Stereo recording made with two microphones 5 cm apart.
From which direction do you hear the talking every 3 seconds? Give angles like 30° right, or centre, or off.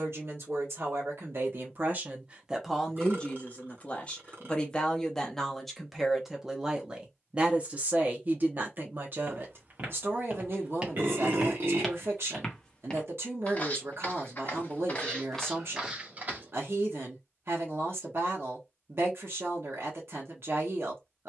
40° right, 20° left, 30° right, 50° right, 60° right, 60° right, 60° right.